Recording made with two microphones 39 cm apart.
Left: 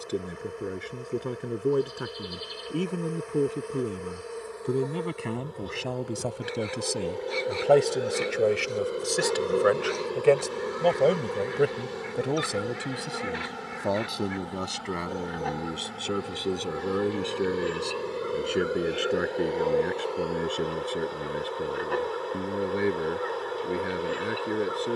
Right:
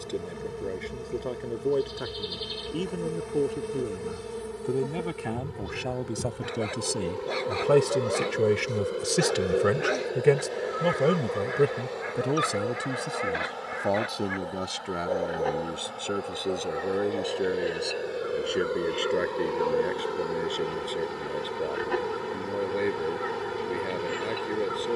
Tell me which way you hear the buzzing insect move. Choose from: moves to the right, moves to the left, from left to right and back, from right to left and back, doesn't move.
from right to left and back.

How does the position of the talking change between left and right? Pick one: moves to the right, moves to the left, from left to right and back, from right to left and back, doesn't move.
from left to right and back.